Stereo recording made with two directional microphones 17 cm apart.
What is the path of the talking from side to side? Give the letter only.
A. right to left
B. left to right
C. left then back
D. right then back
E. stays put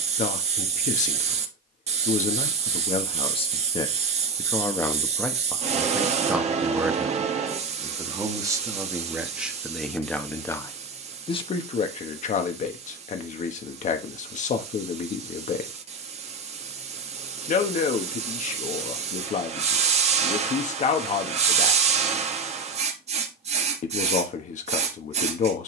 D.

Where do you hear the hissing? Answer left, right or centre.
right.